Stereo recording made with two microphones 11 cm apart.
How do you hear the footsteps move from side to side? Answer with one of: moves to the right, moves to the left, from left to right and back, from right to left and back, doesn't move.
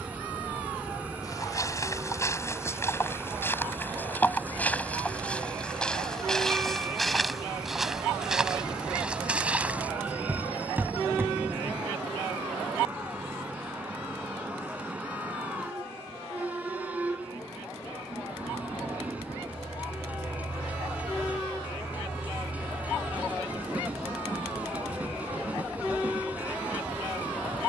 moves to the right.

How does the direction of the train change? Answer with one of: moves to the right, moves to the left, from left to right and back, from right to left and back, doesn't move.
doesn't move.